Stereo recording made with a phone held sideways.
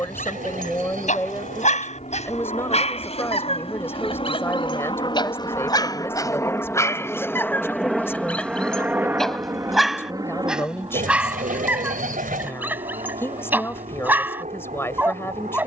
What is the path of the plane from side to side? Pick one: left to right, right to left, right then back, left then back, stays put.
left to right.